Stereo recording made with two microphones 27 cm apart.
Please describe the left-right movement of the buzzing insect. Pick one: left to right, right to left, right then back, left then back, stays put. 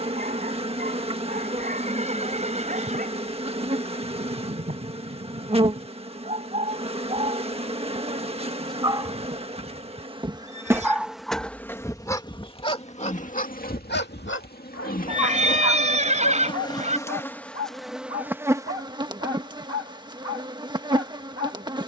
left then back.